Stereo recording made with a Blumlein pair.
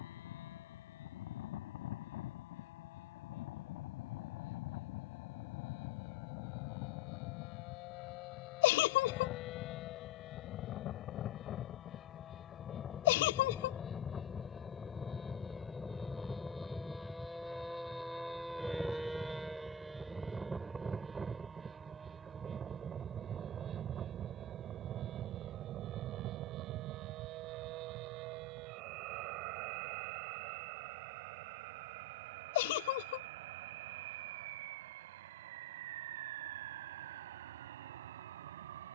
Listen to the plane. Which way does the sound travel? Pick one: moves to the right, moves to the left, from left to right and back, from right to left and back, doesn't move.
moves to the right.